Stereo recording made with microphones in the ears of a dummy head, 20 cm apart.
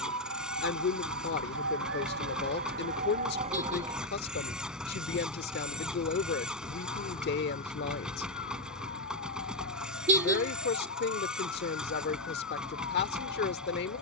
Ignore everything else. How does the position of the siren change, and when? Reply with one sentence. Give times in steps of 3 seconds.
You can hear the siren on the right from 0 s, in the centre from 3 s and on the left from 6 s.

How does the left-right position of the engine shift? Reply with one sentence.
You can hear the engine stay put.